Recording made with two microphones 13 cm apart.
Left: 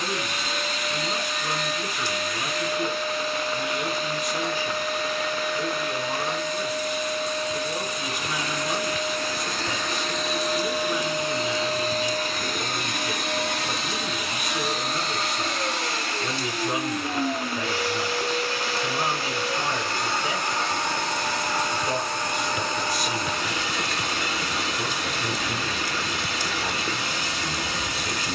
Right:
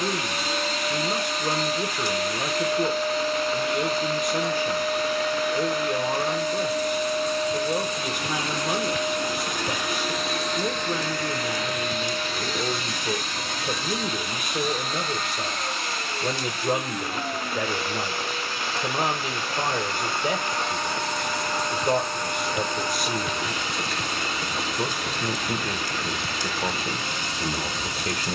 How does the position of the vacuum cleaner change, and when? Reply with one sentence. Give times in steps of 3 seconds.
In this clip you hear the vacuum cleaner on the right from 0 s, in the centre from 9 s and on the left from 12 s.